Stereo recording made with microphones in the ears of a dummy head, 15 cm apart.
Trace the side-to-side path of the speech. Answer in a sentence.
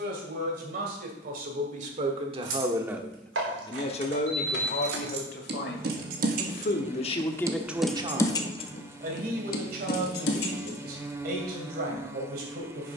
In this clip you hear the speech move from right to left and back again.